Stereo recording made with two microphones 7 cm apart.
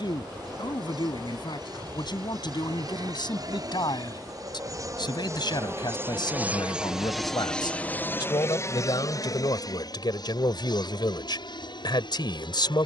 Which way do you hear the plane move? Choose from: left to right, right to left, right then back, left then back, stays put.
right to left.